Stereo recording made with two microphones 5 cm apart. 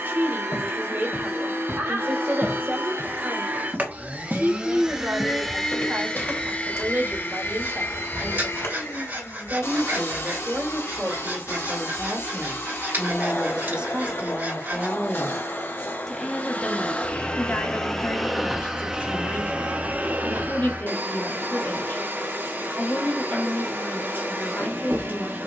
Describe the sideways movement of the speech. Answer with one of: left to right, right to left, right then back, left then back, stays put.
right to left.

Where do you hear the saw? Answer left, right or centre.
right.